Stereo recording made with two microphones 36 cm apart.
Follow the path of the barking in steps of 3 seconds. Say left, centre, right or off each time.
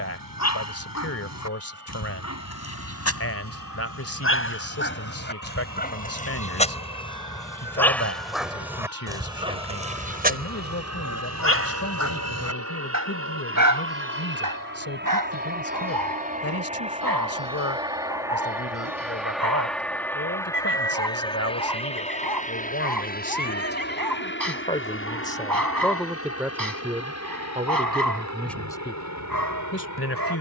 left, left, centre, right, right, right, right, right, right, right.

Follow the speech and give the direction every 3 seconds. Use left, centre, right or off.
left, left, left, left, left, left, left, left, centre, centre.